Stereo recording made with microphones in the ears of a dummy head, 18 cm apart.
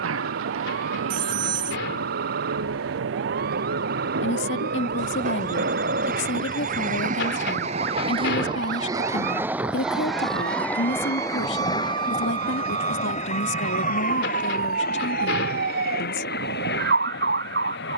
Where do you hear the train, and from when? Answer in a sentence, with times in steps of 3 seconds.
In this clip you hear the train on the right from 0 s, in the centre from 9 s and on the left from 12 s.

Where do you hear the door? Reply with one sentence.
In this clip you hear the door on the left.